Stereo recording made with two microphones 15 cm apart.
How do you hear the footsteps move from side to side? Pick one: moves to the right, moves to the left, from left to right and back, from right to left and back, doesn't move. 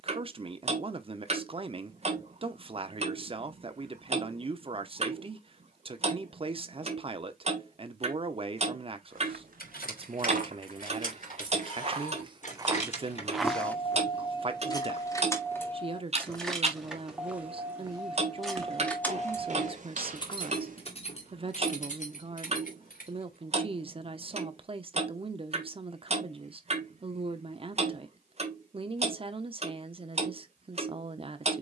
from right to left and back.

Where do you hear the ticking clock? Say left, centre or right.
right.